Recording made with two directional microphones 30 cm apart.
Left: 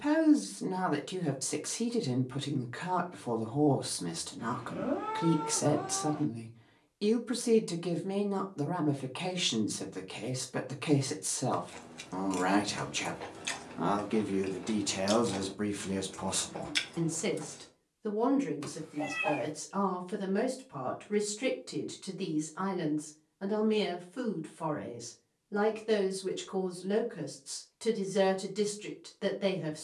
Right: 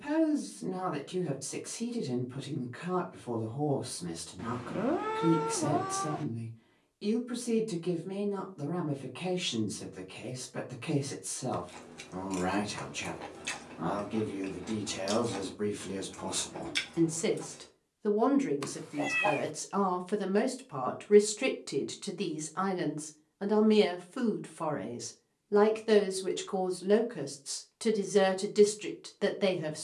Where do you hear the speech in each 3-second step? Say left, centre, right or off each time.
left, left, left, left, left, centre, right, right, right, right.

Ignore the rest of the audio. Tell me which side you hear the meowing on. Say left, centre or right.
right.